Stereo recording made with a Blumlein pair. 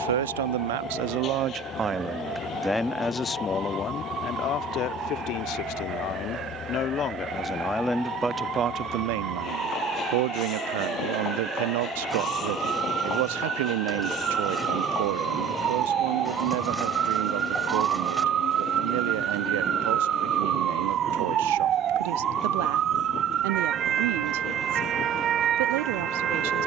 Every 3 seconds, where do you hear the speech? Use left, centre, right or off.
right, left, centre, right, right, right, right, right, right.